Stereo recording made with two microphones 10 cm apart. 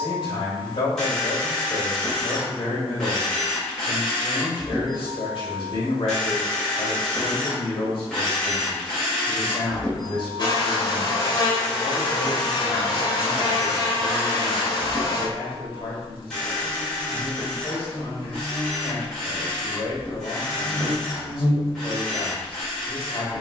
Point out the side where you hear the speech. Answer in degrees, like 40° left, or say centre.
50° left.